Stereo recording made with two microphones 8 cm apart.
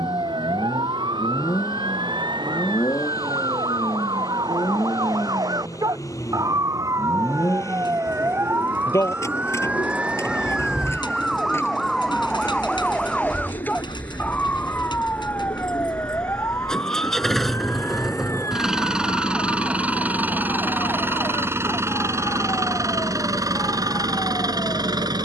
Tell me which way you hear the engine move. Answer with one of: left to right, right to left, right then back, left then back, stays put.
left to right.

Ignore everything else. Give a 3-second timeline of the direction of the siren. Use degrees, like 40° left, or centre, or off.
70° right, 60° right, 40° right, 10° right, 10° left, 30° left, 40° left, 50° left, 50° left.